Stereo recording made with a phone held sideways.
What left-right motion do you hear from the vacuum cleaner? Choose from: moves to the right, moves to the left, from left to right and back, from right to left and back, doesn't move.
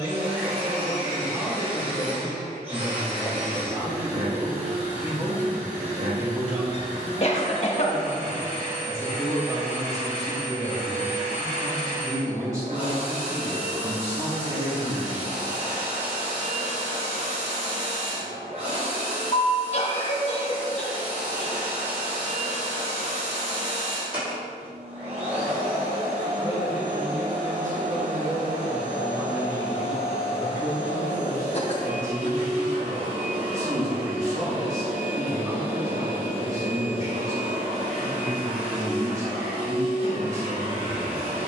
doesn't move.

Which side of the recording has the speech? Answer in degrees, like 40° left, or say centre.
20° right.